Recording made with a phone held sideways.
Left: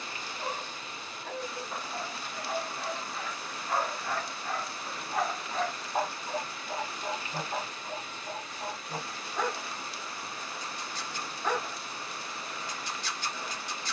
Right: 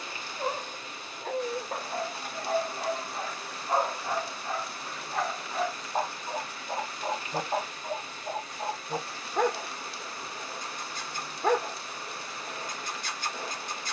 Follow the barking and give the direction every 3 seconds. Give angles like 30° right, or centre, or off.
50° right, 20° right, 30° right, 50° right, 50° right.